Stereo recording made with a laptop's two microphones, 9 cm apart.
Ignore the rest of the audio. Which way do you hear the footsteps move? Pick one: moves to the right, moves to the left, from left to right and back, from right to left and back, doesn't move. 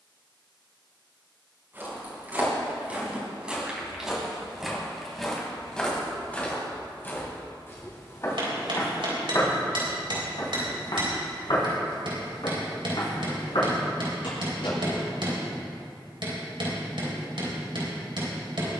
moves to the left.